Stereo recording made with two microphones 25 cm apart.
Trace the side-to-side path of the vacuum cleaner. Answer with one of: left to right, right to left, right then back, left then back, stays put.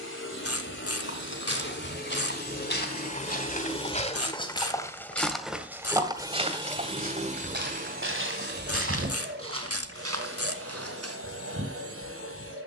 left to right.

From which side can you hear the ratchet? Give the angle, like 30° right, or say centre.
60° left.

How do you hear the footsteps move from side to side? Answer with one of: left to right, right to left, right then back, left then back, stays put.
left to right.